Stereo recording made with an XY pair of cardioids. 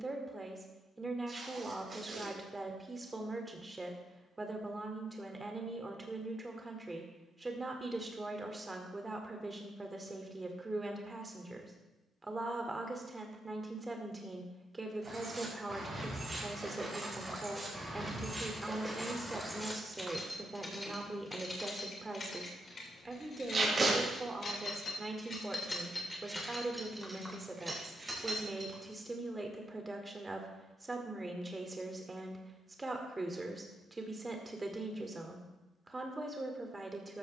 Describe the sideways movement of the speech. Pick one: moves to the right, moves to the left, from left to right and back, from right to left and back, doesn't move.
doesn't move.